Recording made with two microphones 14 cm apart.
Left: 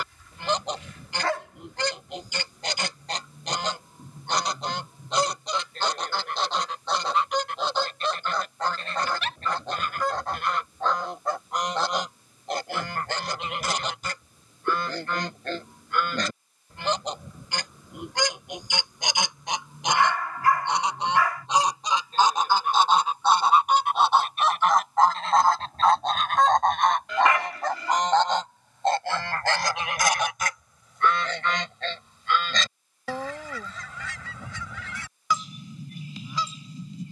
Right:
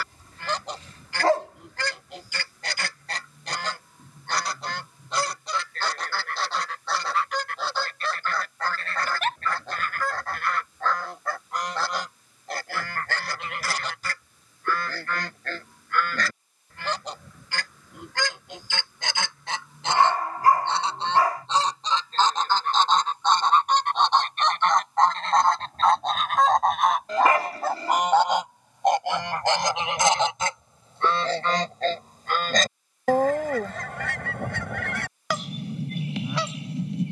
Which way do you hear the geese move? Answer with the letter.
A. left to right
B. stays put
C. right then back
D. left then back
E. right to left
A.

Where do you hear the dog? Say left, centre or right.
right.